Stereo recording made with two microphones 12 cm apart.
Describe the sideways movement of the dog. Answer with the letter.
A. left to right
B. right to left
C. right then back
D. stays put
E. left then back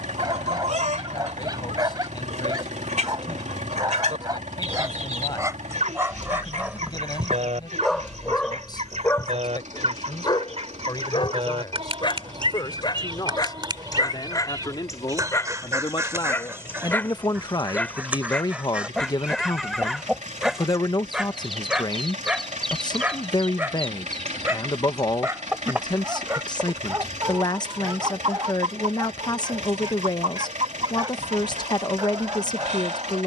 E.